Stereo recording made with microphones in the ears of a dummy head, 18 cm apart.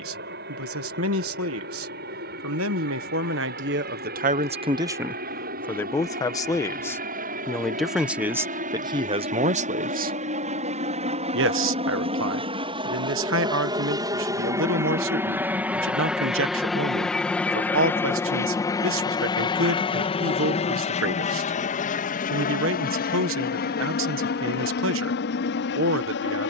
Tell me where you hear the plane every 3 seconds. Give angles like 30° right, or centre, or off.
60° right, 50° right, 50° right, 40° right, 20° right, centre, 20° left, 40° left, 60° left.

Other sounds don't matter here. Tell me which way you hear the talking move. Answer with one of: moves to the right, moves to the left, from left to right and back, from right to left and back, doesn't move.
from right to left and back.